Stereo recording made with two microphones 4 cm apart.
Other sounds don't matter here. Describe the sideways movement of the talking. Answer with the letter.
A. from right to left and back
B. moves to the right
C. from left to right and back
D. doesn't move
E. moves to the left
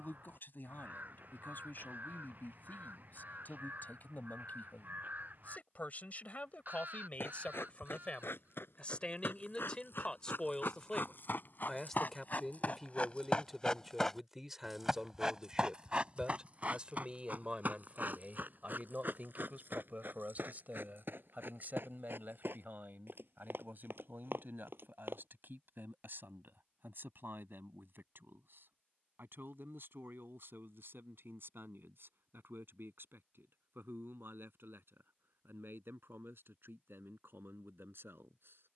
B.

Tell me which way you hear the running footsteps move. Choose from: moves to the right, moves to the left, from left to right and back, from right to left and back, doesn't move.
moves to the right.